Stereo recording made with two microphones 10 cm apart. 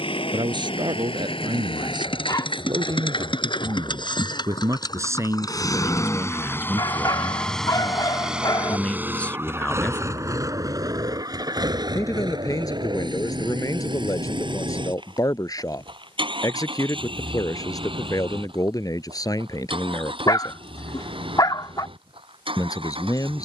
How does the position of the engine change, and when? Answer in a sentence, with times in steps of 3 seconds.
In this clip you hear the engine on the left from 0 s, in the centre from 6 s and on the right from 9 s.